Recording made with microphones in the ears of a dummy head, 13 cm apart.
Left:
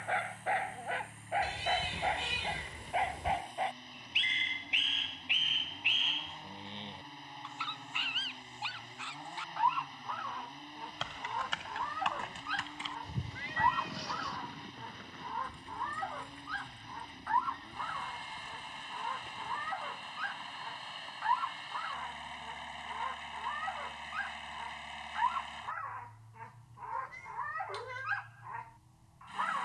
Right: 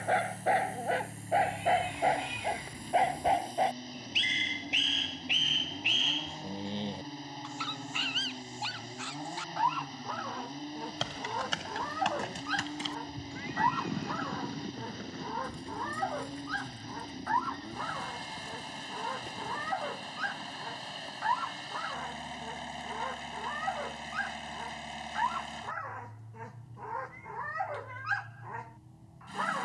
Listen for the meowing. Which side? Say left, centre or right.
left.